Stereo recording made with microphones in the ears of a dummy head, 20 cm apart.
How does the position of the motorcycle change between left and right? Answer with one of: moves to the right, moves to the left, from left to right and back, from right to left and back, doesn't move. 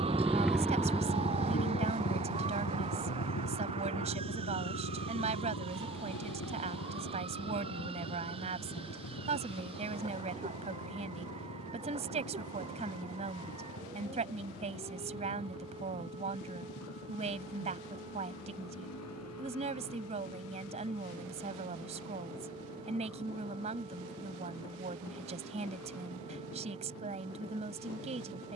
moves to the left.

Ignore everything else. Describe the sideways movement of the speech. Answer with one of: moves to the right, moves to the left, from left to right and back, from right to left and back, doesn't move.
doesn't move.